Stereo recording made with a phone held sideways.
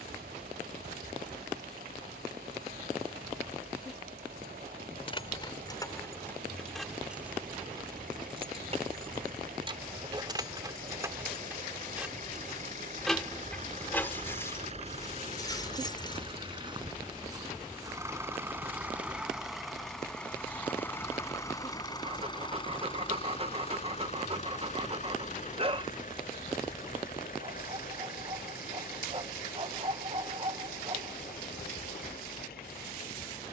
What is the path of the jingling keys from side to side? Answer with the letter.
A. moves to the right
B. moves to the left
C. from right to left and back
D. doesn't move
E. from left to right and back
E.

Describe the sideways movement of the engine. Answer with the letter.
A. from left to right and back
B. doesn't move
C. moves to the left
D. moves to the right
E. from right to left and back
C.